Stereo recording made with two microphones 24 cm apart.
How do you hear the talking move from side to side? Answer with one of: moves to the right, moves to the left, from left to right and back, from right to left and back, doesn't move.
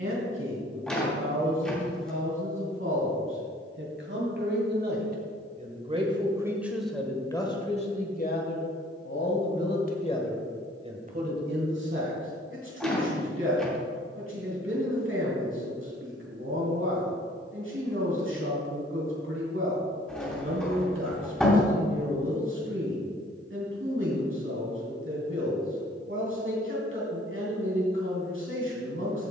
from right to left and back.